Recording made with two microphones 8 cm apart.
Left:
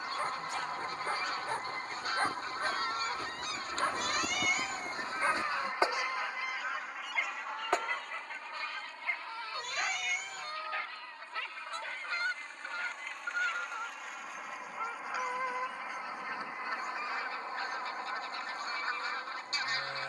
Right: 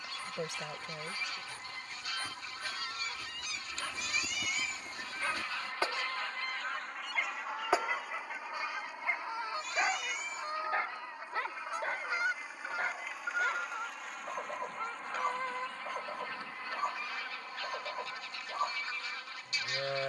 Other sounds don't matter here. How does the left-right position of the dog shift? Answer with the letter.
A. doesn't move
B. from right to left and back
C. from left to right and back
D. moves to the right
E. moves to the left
D.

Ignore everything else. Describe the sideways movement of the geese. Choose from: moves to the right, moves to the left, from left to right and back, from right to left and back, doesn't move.
from left to right and back.